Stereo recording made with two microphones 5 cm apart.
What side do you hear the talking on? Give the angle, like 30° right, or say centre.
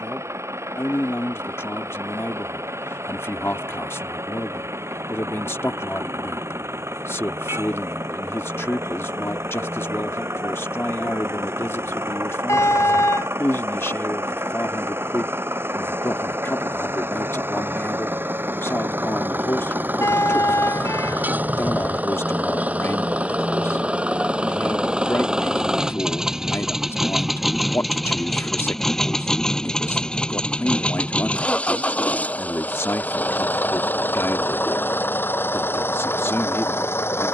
50° left.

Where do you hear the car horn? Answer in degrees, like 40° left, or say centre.
80° left.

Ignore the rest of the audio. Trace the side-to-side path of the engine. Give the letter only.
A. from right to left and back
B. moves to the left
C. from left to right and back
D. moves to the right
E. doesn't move
B.